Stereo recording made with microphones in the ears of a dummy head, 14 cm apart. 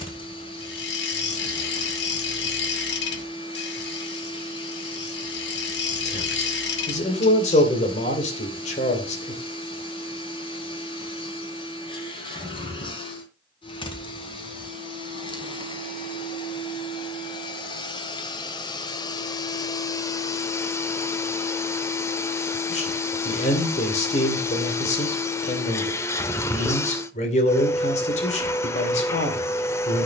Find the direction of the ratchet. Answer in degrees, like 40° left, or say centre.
80° left.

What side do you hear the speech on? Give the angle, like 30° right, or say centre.
40° left.